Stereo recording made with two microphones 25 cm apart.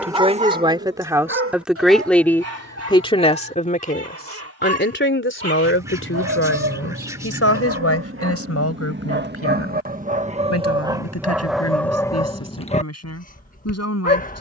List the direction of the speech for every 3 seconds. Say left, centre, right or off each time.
centre, left, left, left, left.